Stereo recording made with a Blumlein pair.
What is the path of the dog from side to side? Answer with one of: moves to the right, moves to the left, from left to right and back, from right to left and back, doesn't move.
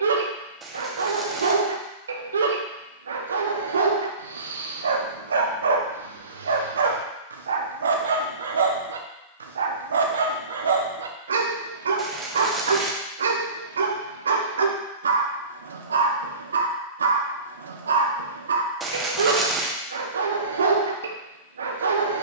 doesn't move.